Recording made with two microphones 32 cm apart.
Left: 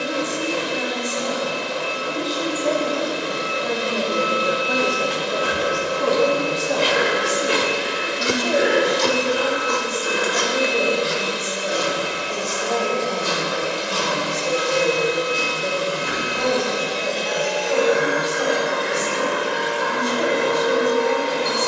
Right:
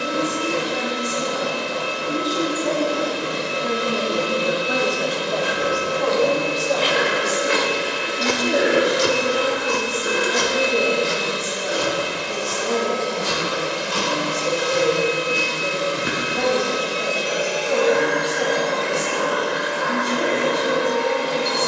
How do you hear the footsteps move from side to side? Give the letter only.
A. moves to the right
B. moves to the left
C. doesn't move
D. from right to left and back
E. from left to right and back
A.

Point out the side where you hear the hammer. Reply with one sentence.
In this clip you hear the hammer on the right.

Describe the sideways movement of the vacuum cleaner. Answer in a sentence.
You can hear the vacuum cleaner move from right to left.